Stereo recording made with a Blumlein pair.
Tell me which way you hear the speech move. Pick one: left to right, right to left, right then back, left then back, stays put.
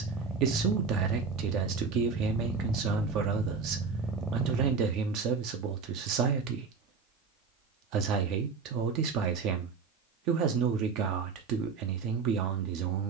stays put.